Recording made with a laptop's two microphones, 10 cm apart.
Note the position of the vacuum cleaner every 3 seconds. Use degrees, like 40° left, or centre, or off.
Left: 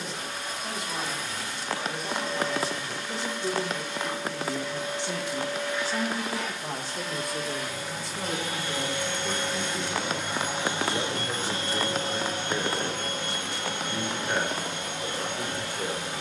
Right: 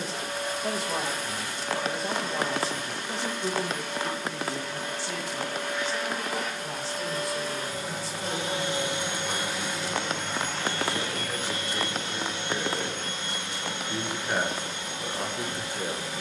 50° right, 50° right, 40° right, 10° left, 60° left, 70° left.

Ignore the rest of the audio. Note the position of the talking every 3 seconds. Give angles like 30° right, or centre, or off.
30° right, 10° left, 50° left, 40° left, centre, 20° right.